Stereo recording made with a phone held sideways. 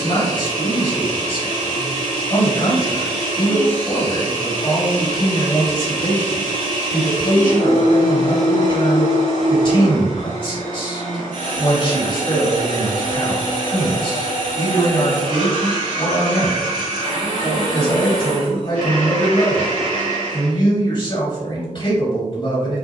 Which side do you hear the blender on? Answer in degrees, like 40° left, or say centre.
80° left.